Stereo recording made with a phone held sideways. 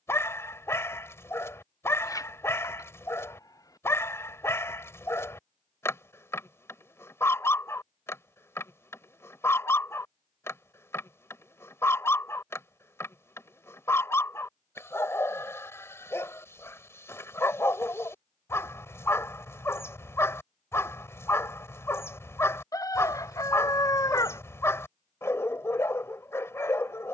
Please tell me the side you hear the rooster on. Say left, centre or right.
left.